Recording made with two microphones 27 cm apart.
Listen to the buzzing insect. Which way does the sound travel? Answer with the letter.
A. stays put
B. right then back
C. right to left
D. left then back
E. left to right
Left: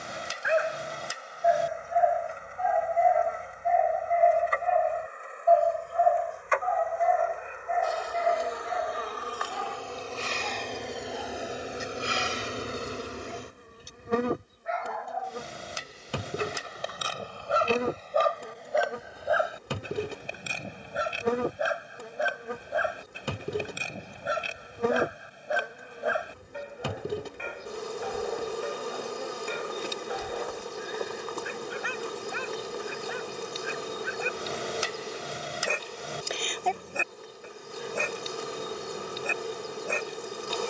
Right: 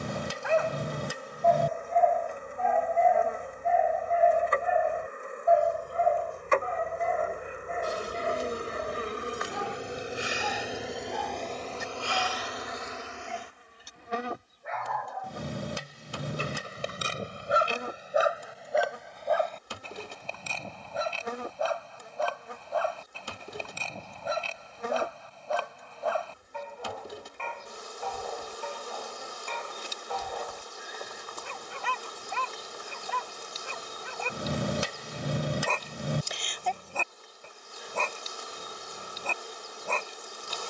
C.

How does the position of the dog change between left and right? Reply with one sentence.
You can hear the dog move from left to right and back again.